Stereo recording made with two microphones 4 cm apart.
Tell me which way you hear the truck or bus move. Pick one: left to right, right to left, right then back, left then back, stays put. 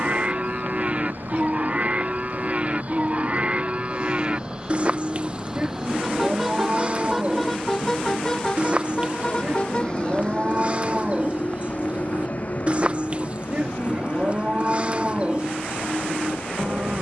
right to left.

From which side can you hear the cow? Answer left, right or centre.
right.